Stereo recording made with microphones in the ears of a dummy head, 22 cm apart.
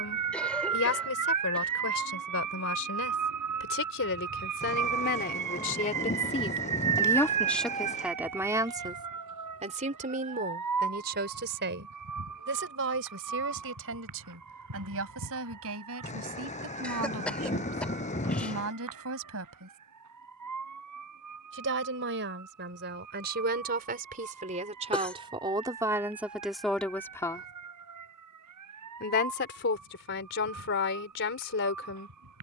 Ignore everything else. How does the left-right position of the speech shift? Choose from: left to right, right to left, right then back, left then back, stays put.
right then back.